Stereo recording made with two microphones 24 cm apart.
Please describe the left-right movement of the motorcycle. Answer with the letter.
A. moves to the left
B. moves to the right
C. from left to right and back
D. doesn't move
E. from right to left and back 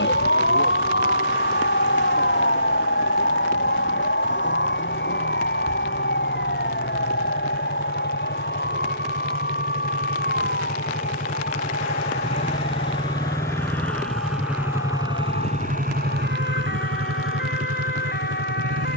B.